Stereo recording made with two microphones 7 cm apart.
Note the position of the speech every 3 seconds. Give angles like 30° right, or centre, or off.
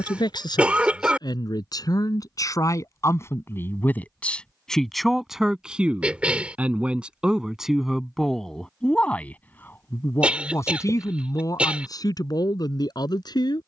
60° left, 10° left, centre, 40° left, 60° left.